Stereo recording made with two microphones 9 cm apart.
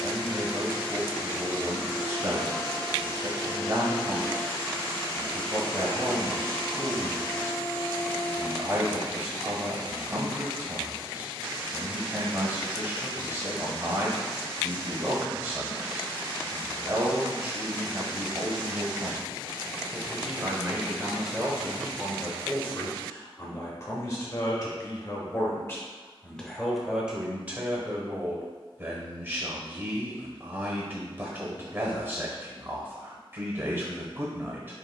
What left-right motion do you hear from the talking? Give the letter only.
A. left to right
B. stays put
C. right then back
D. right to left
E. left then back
E.